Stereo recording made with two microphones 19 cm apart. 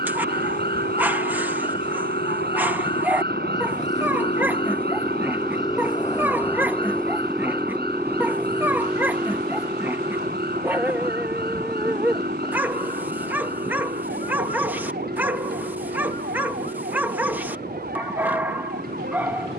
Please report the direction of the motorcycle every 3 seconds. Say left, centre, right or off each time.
left, left, centre, right, right, right, right.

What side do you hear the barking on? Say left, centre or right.
centre.